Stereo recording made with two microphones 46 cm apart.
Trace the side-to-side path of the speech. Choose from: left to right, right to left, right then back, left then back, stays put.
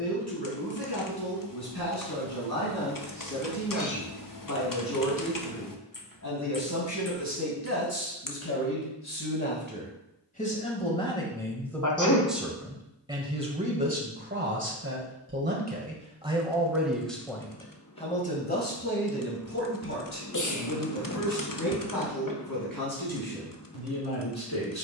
right then back.